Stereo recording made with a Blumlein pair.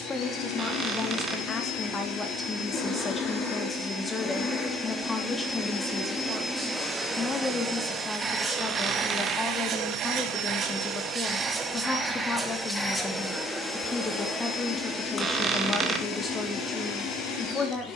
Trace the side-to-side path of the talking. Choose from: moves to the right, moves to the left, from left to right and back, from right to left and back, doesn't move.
doesn't move.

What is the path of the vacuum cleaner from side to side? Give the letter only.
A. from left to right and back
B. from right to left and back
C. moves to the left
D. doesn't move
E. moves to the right
A.